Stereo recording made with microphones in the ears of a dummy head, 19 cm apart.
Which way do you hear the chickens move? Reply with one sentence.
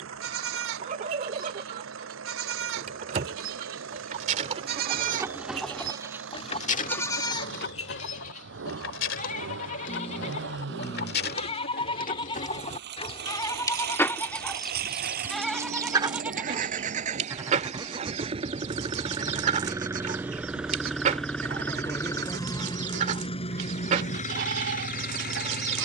You can hear the chickens move from right to left and back again.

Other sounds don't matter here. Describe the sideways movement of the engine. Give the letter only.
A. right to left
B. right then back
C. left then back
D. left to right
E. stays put
A.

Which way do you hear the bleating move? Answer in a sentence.
In this clip you hear the bleating move from right to left and back again.